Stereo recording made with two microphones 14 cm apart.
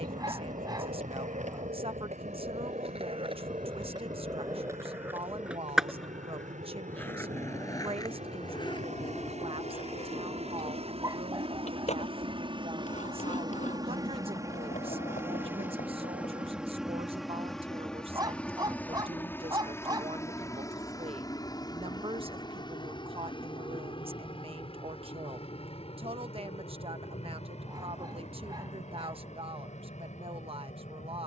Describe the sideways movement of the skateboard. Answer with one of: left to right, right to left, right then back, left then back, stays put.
right to left.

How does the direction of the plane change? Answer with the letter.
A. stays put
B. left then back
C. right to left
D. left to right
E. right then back
C.